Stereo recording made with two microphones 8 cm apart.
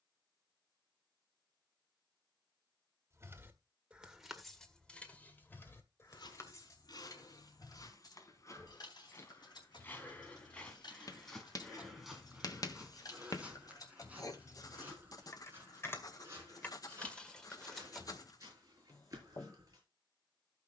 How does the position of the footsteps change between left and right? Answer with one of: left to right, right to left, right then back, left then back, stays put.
left to right.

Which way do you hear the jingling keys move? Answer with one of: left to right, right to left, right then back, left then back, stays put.
left then back.